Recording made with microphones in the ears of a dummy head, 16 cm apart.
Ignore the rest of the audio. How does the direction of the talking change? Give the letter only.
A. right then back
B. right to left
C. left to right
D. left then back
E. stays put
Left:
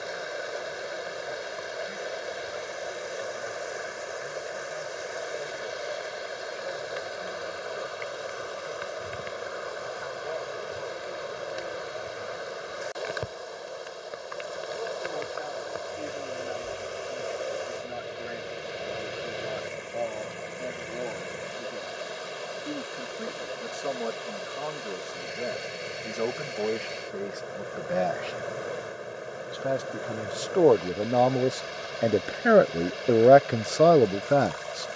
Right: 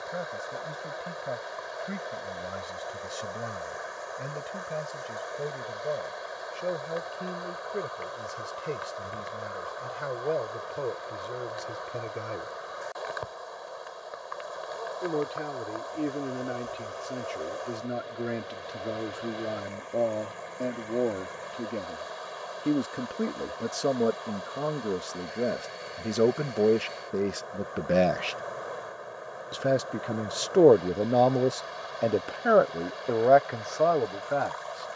B.